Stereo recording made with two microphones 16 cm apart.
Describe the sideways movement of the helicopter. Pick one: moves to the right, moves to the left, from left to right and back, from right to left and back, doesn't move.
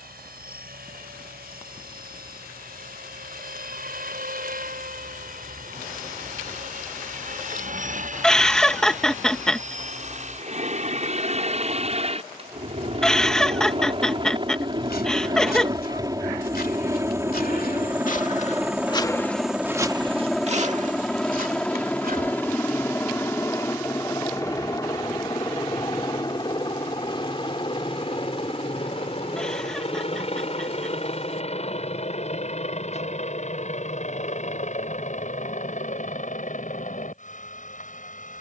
moves to the left.